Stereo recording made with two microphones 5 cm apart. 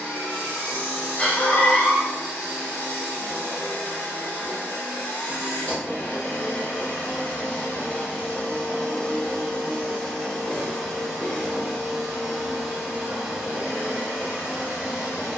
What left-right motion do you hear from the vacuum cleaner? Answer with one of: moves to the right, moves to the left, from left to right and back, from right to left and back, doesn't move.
moves to the right.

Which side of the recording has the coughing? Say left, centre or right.
left.